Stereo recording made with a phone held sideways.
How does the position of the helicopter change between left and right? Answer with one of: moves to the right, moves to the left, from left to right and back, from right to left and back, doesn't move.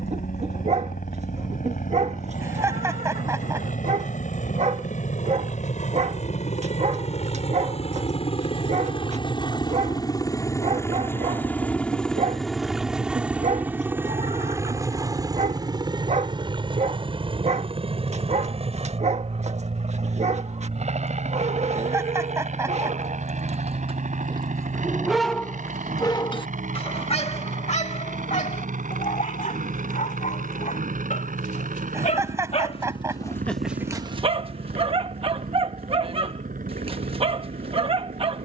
moves to the right.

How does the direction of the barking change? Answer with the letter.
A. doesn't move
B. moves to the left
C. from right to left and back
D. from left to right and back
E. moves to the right
C.